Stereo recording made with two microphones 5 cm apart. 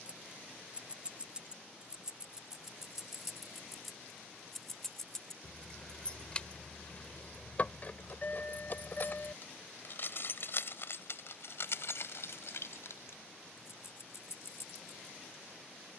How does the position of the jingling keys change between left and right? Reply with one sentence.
In this clip you hear the jingling keys travel towards the left.